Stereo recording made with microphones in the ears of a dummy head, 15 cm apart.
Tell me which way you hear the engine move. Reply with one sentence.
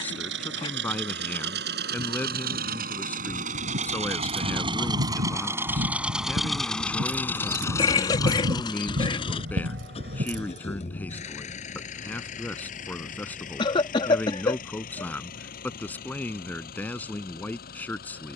You can hear the engine move from right to left.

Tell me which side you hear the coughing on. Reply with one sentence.
You can hear the coughing on the left.